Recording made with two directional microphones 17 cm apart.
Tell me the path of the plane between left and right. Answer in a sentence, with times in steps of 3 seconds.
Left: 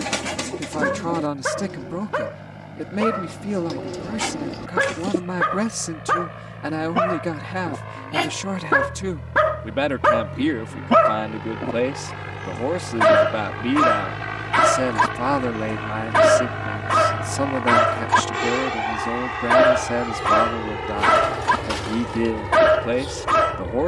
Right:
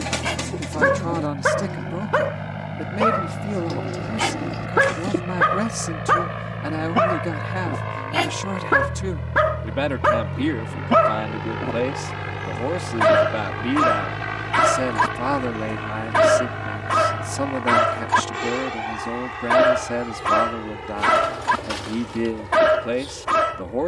You can hear the plane on the right from 0 s, in the centre from 12 s and on the left from 18 s.